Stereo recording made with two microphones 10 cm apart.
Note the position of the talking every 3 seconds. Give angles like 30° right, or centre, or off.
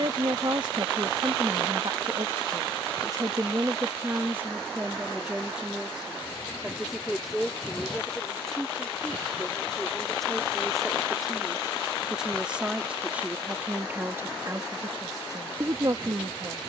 50° right, 20° right, centre, centre, 20° right, 40° right.